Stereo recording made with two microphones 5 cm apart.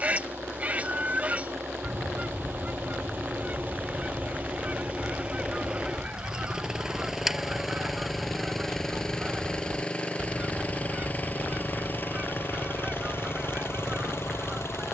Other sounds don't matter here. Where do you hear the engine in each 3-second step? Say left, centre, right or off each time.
right, right, centre, left, left.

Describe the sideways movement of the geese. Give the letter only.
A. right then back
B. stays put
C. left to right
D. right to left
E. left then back
B.